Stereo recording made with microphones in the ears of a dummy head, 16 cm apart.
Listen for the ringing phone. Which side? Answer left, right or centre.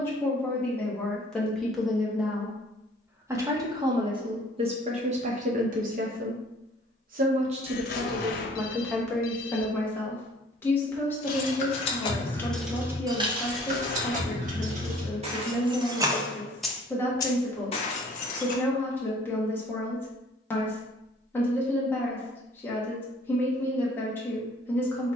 left.